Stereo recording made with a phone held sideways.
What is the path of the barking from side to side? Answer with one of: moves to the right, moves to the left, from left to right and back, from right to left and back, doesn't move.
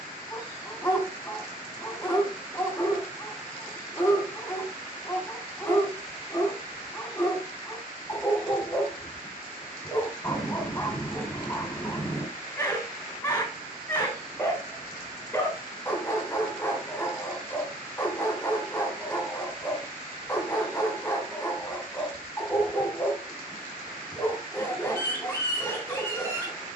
doesn't move.